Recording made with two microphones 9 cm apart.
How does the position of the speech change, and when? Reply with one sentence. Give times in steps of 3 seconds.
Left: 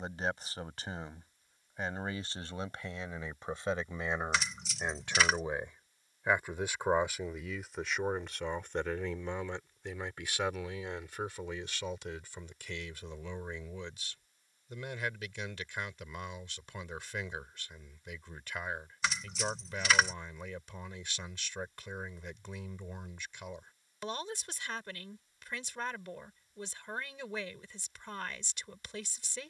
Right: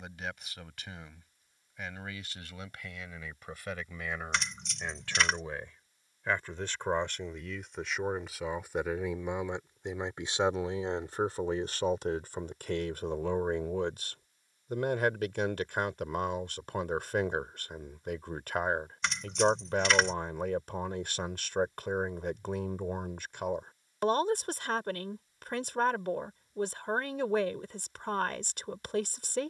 You can hear the speech on the left from 0 s, in the centre from 6 s and on the right from 9 s.